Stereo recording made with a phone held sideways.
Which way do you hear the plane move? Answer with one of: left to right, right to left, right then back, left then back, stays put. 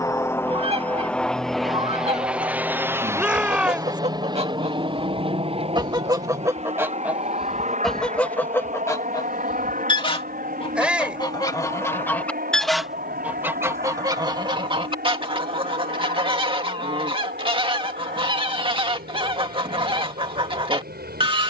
left to right.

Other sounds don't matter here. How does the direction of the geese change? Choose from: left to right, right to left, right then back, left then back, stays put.
left then back.